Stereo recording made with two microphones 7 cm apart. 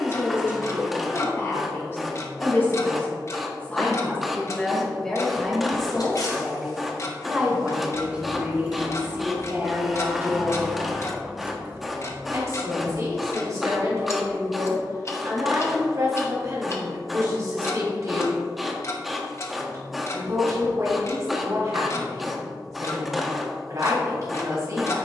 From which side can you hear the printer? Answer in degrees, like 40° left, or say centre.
centre.